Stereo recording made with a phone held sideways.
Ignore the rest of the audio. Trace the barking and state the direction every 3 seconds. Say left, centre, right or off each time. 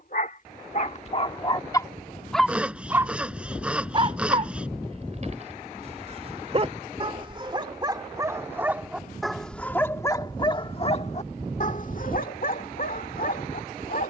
left, right, right, left, left.